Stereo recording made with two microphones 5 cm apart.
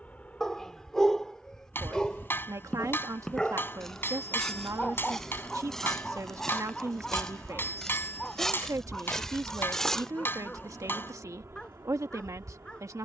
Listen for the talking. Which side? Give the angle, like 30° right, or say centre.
80° right.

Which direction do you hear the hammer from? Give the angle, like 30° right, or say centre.
40° left.